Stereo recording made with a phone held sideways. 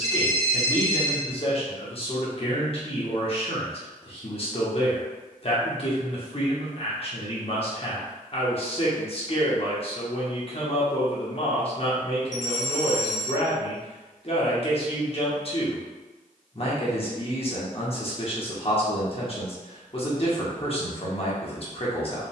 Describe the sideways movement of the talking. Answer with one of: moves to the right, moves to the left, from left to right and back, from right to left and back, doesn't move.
doesn't move.